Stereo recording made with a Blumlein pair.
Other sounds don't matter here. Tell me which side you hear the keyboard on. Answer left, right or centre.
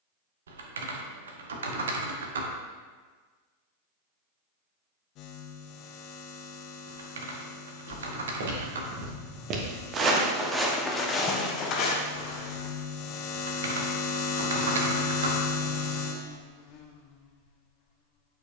right.